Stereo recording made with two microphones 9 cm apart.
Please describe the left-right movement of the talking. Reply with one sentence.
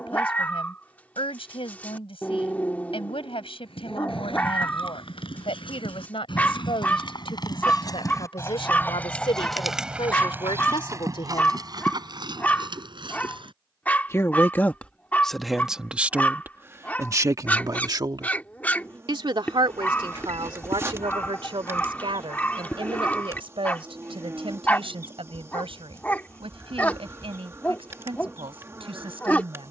You can hear the talking go from the left side to the right.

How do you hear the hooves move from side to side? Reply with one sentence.
You can hear the hooves go from the left side to the right.